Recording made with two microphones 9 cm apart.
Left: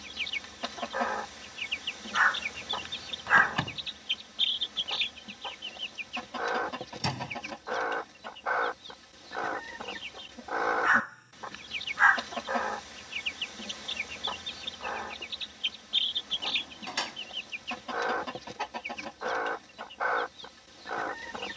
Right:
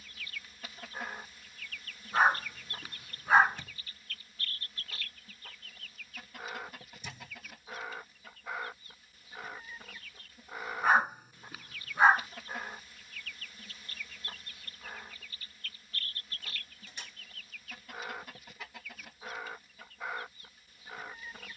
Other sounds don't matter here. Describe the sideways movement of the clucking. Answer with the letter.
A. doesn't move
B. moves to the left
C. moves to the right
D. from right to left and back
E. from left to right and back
A.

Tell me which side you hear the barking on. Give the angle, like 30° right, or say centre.
10° right.